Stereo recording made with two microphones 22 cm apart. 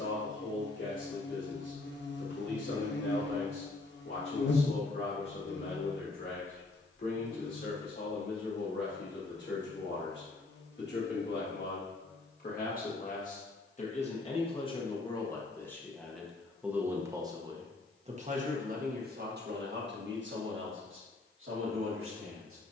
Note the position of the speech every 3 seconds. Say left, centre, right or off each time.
left, left, left, left, left, centre, right, right.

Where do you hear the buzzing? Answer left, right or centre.
left.